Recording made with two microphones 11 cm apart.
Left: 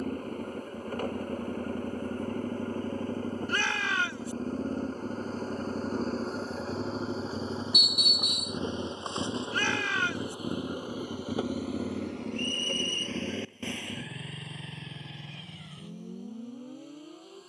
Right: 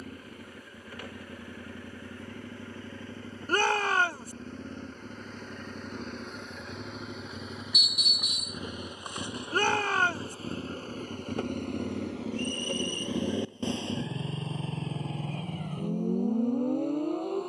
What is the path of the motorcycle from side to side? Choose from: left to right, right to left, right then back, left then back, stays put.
left to right.